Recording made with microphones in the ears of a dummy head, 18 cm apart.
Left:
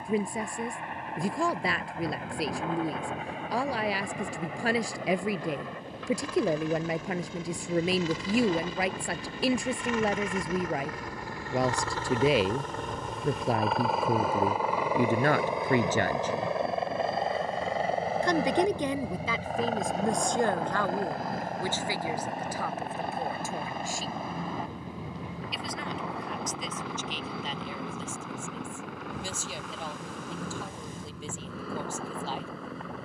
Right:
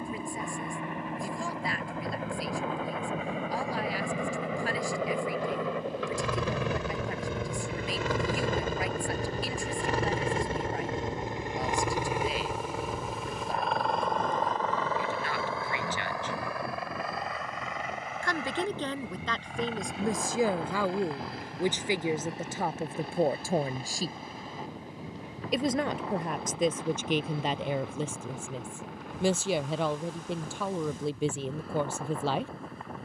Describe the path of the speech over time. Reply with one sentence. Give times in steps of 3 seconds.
In this clip you hear the speech on the left from 0 s, in the centre from 18 s and on the right from 21 s.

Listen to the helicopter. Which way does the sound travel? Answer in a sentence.
In this clip you hear the helicopter travel towards the left.